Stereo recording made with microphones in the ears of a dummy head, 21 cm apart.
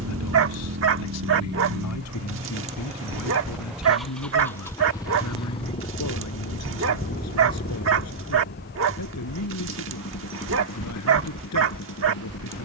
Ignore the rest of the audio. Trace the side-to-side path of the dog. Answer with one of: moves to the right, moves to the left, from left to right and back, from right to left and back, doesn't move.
doesn't move.